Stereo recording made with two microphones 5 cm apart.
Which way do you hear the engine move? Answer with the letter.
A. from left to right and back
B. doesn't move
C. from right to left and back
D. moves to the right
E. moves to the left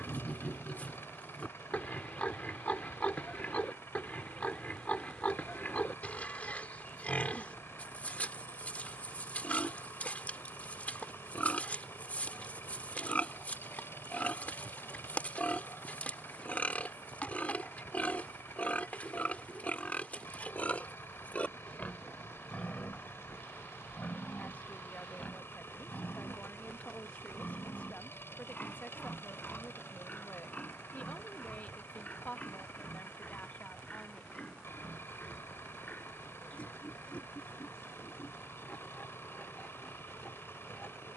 B.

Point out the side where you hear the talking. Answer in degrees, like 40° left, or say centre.
40° left.